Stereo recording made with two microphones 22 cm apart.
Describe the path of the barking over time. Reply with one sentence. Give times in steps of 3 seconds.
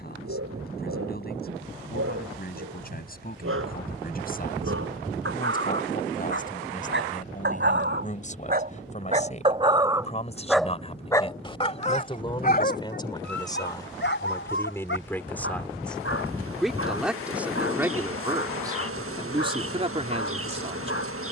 You can hear the barking on the right from 0 s, in the centre from 9 s and on the left from 12 s.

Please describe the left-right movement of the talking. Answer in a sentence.
You can hear the talking move from left to right.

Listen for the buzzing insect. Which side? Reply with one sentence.
In this clip you hear the buzzing insect on the right.